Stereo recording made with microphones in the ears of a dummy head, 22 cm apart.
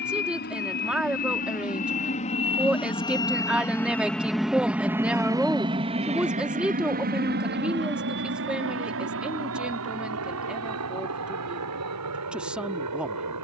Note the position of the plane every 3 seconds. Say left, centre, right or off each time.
left, centre, right, right, right.